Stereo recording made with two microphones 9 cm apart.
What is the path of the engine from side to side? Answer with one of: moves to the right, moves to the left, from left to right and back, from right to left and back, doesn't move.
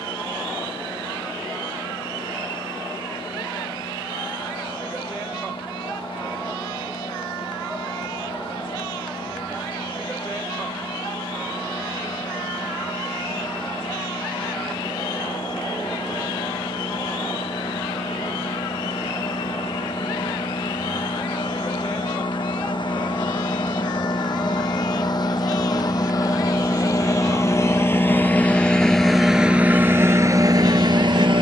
moves to the right.